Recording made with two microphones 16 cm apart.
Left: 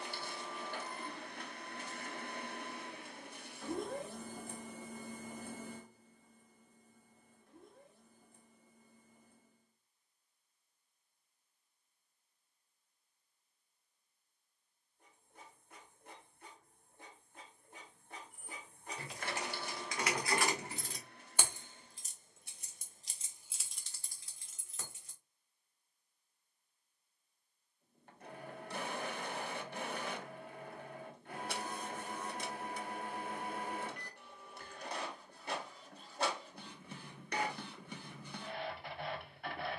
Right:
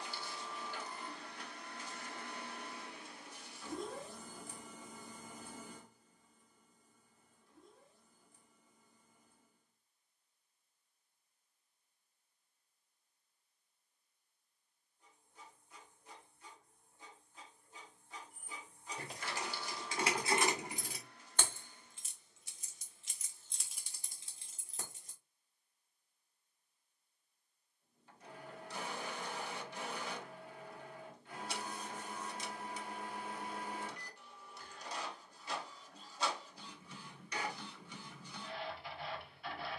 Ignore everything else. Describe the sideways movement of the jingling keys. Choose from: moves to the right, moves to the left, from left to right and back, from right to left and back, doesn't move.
from right to left and back.